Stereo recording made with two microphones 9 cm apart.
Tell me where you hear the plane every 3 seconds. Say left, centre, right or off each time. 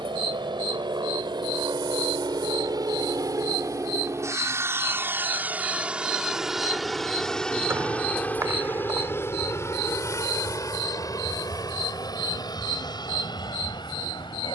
right, right, centre, left, left.